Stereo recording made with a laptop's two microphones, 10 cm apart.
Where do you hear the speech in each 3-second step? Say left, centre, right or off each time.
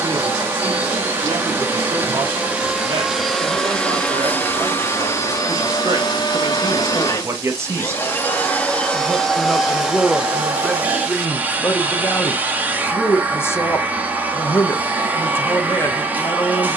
right, right, right, centre, left, left.